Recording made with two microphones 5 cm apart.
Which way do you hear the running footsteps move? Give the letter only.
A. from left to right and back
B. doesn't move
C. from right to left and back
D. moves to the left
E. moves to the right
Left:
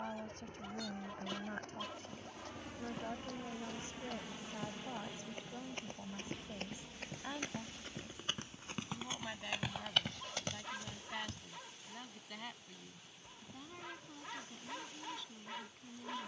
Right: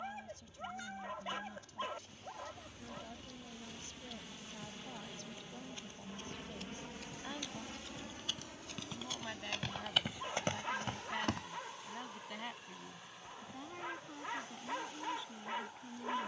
E.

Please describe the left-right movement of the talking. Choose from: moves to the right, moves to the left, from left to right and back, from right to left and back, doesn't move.
moves to the right.